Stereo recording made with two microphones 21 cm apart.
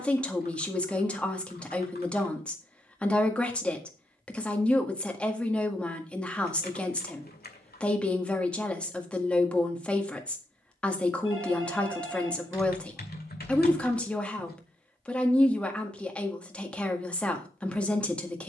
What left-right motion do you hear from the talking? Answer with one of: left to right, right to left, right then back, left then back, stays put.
stays put.